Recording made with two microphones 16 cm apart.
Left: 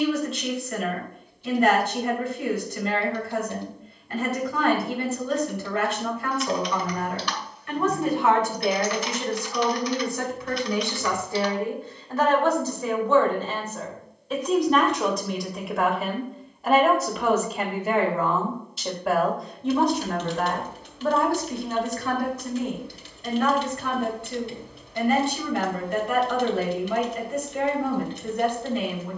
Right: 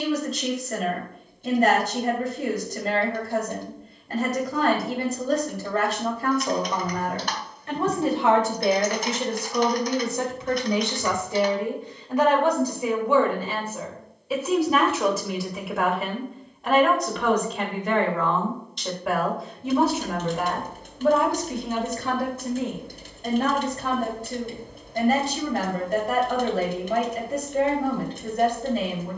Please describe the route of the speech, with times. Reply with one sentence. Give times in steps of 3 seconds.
In this clip you hear the speech on the right from 0 s, in the centre from 12 s and on the right from 21 s.